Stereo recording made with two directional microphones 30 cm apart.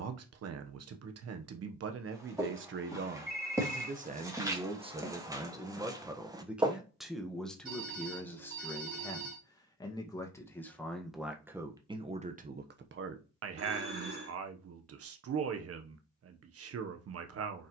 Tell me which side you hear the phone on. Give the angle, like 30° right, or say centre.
50° right.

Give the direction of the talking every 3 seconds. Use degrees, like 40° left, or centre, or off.
50° right, 20° right, centre, centre, 40° right, 50° right.